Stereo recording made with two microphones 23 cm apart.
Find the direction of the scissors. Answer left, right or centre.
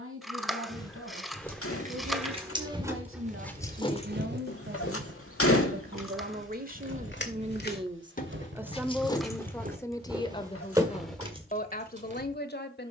centre.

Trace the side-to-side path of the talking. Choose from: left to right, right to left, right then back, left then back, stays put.
right to left.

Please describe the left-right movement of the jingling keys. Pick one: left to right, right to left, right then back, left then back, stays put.
left then back.